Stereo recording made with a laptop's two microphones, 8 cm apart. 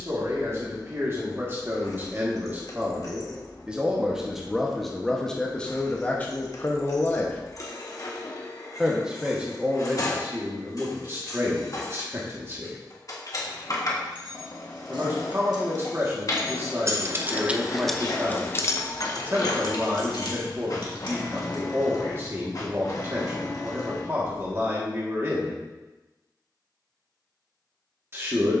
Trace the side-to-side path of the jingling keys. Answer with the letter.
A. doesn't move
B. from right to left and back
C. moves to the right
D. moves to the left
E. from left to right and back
D.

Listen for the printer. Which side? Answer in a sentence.
You can hear the printer on the left.